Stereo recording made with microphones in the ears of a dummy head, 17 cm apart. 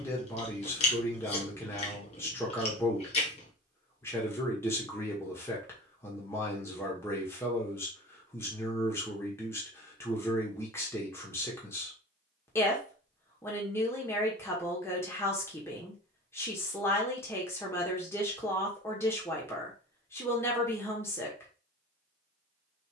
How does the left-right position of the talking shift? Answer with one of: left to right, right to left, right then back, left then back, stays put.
stays put.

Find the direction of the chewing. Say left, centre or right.
left.